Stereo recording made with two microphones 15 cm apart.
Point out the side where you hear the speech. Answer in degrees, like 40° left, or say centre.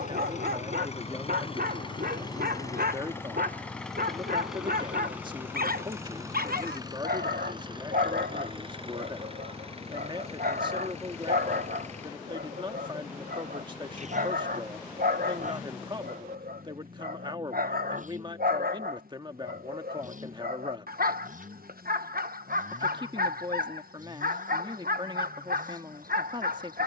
30° right.